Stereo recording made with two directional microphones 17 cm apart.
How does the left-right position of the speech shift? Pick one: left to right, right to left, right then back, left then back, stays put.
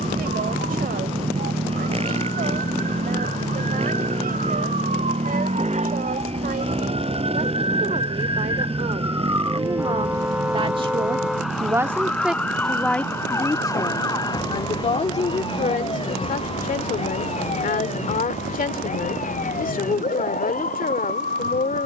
right to left.